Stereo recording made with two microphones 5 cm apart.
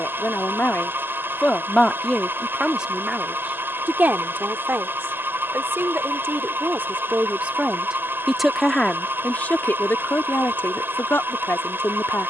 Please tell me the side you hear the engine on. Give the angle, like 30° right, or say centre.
50° right.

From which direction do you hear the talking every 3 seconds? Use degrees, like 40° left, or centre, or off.
20° left, 40° right, 20° right, 40° left.